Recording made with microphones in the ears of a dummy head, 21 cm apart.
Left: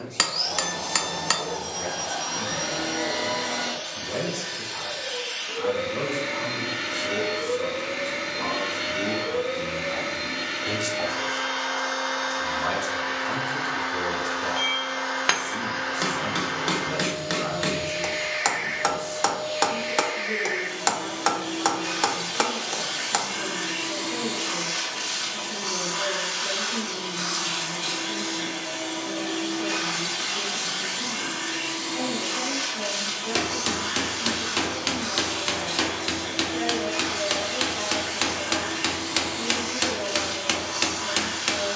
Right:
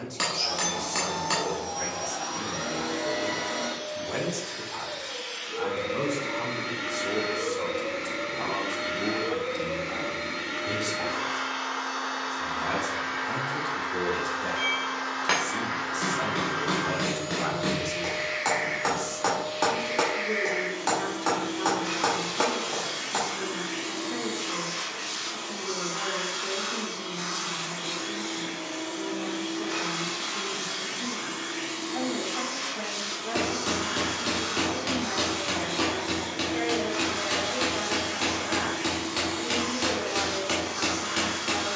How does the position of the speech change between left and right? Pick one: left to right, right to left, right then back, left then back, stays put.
left then back.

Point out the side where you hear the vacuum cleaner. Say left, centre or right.
left.